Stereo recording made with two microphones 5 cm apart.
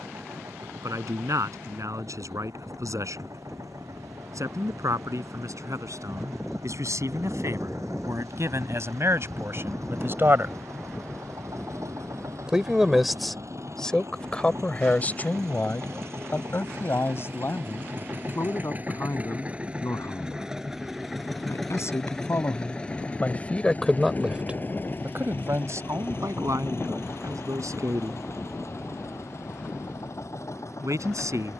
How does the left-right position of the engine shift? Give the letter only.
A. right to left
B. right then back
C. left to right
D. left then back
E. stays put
A.